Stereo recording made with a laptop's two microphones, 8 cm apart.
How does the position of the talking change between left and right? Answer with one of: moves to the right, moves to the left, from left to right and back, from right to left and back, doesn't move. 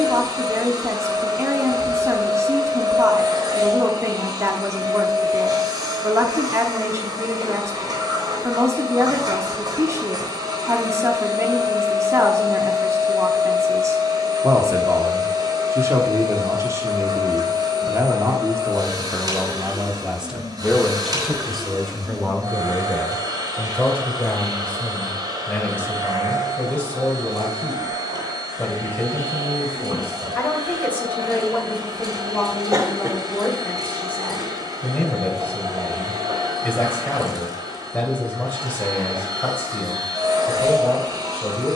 moves to the left.